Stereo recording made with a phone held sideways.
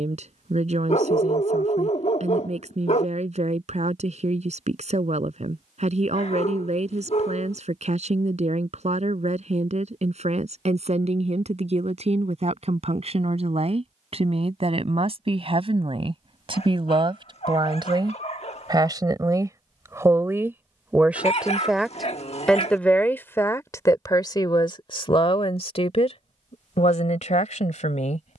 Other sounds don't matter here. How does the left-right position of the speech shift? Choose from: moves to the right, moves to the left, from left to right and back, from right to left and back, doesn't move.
moves to the left.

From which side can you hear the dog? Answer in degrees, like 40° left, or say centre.
50° left.